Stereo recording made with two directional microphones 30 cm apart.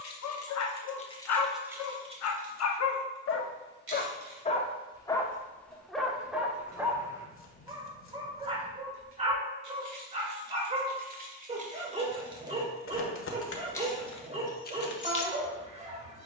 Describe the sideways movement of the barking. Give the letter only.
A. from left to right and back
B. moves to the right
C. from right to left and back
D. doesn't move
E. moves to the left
B.